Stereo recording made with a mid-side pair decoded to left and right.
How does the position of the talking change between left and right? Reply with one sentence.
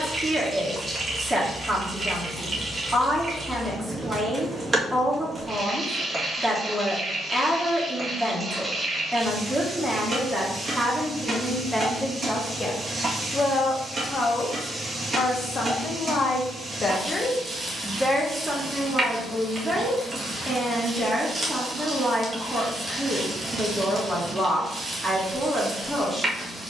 In this clip you hear the talking go left and come back.